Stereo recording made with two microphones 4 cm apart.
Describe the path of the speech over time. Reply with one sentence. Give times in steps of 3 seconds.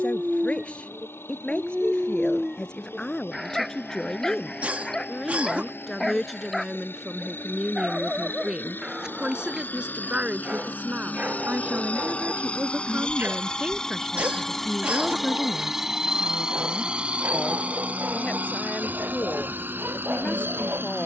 In this clip you hear the speech on the left from 0 s, in the centre from 3 s, on the right from 9 s, in the centre from 15 s and on the left from 18 s.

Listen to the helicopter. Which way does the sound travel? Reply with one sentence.
In this clip you hear the helicopter move to the right.